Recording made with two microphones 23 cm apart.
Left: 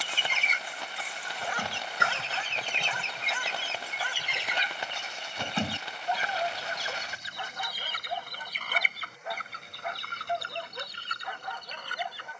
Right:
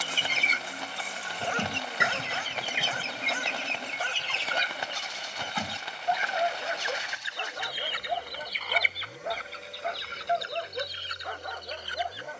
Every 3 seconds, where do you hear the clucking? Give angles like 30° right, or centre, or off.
20° right, 10° left, 40° left, 60° left.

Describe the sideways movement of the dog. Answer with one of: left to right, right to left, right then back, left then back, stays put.
stays put.